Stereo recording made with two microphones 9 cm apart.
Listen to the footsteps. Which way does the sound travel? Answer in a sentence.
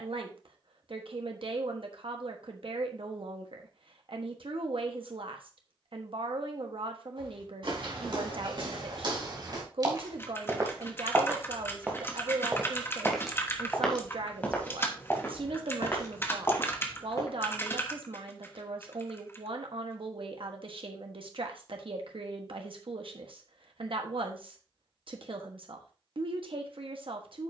You can hear the footsteps travel towards the left.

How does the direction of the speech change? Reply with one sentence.
You can hear the speech stay in one place.